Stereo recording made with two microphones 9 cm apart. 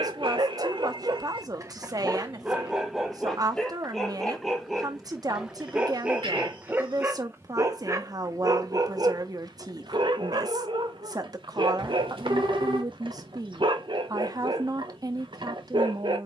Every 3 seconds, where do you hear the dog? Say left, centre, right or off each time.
right, centre, right, right, right, right.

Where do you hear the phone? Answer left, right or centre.
right.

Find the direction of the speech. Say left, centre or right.
right.